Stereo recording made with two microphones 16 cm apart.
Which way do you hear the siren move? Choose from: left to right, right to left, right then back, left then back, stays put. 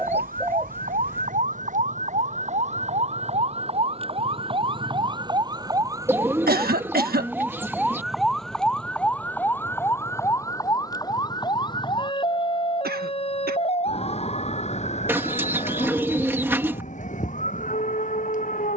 right to left.